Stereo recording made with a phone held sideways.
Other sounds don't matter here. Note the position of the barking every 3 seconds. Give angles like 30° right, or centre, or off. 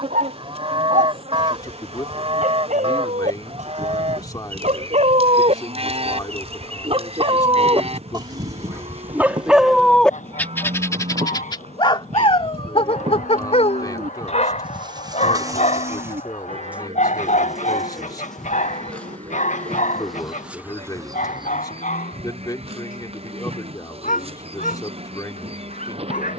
70° right, 60° right, 40° right, 10° left, 50° left, 70° left, 70° left, 80° left, 80° left.